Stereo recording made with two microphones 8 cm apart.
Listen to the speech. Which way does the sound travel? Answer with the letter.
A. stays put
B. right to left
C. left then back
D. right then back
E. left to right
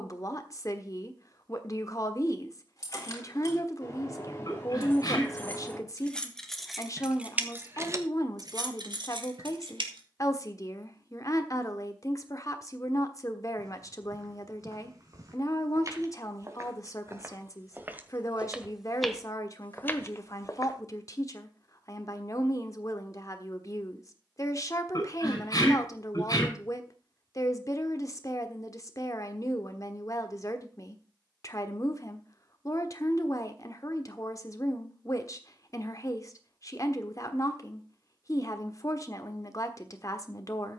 A.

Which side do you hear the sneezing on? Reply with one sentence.
You can hear the sneezing on the left.